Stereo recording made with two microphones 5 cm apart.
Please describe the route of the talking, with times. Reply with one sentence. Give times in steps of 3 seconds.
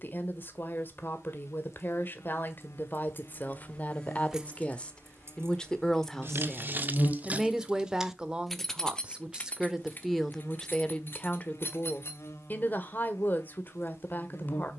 You can hear the talking on the left from 0 s, in the centre from 6 s and on the left from 12 s.